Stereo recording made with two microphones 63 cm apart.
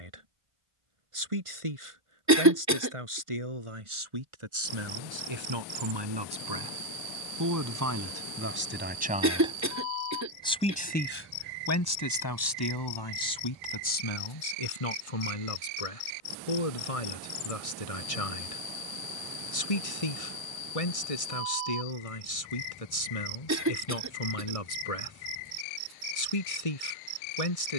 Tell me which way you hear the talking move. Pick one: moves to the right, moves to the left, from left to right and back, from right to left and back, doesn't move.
moves to the left.